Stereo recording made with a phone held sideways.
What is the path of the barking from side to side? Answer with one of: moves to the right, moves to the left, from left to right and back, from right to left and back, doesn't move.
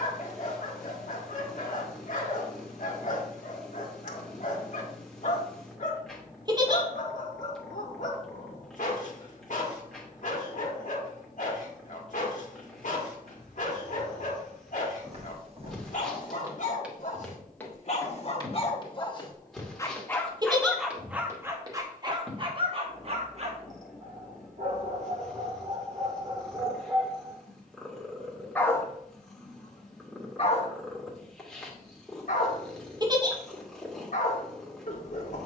from left to right and back.